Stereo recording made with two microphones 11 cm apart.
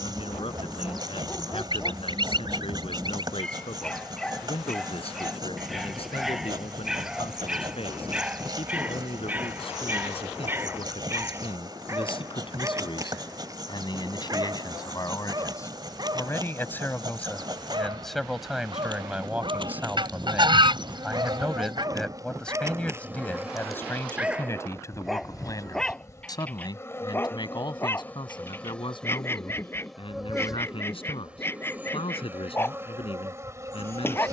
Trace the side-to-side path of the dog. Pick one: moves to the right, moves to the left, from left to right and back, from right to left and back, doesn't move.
from left to right and back.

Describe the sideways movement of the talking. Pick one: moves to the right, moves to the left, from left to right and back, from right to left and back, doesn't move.
from left to right and back.